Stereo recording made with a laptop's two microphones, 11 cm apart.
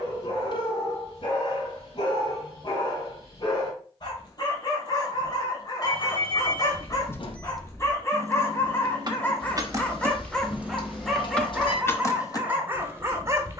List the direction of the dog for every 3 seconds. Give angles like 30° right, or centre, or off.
50° left, 40° left, 30° left, 10° left, 20° right.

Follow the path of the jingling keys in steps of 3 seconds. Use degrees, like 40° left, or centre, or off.
off, off, centre, 10° right, 40° left.